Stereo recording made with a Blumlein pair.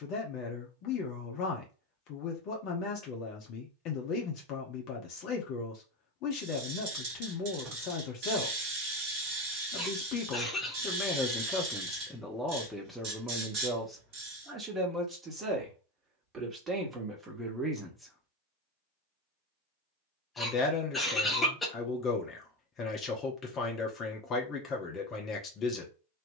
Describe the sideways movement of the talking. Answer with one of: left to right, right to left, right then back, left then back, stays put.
right then back.